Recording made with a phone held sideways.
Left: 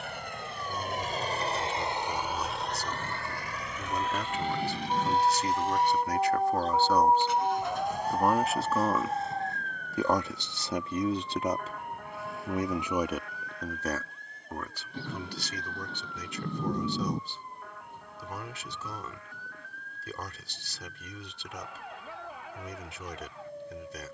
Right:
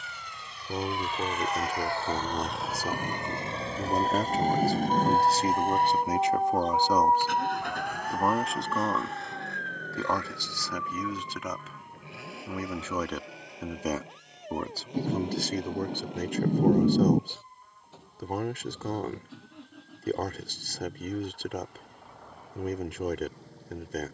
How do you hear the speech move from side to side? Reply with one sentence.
In this clip you hear the speech move from right to left and back again.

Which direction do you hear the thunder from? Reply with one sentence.
In this clip you hear the thunder on the right.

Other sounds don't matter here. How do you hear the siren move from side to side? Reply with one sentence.
In this clip you hear the siren go from the right side to the left.